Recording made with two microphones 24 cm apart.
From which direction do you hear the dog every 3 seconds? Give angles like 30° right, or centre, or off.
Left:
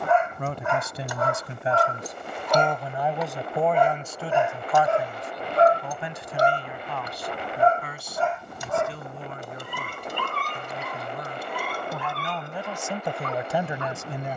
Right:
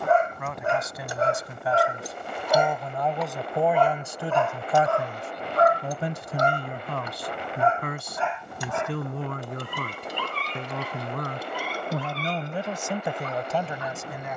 20° right, 20° left, 40° left, 50° left, 60° left.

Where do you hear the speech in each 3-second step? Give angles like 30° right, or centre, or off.
20° left, 20° right, 50° right, 70° right, centre.